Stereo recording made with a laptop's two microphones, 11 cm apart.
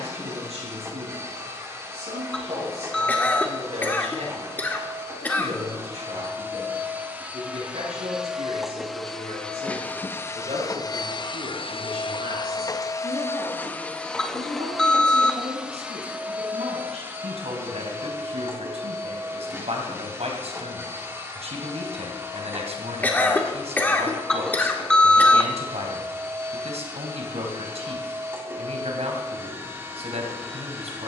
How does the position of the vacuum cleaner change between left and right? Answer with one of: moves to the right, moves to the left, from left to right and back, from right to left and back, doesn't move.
from right to left and back.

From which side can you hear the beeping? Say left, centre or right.
centre.